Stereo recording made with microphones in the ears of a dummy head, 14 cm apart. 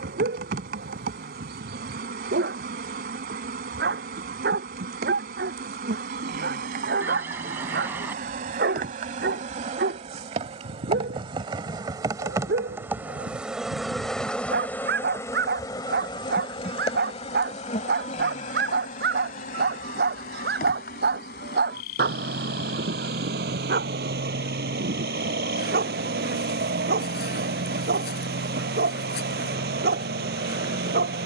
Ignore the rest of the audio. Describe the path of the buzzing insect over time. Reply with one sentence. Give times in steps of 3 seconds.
You can hear the buzzing insect on the right from 0 s, in the centre from 12 s and on the left from 15 s.